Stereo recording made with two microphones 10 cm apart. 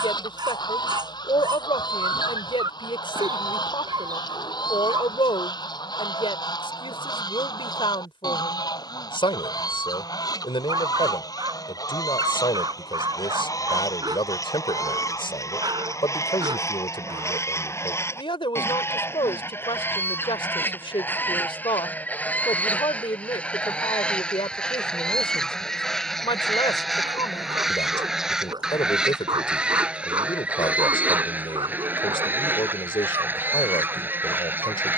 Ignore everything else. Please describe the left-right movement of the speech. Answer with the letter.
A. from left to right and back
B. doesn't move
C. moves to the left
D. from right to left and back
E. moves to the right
B.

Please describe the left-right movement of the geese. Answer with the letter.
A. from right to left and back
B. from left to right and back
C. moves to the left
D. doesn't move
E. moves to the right
E.